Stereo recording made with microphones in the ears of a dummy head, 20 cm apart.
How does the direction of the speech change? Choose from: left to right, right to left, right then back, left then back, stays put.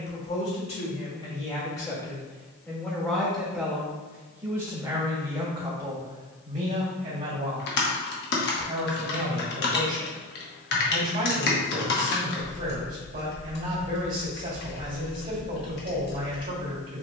left to right.